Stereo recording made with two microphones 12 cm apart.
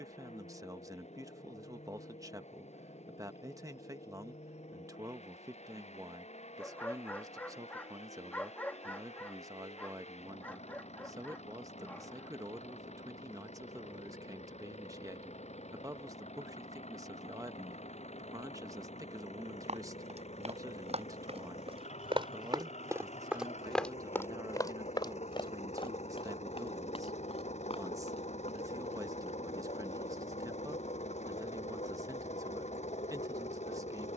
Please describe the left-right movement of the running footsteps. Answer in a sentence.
You can hear the running footsteps move to the left.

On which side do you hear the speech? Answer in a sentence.
You can hear the speech on the right.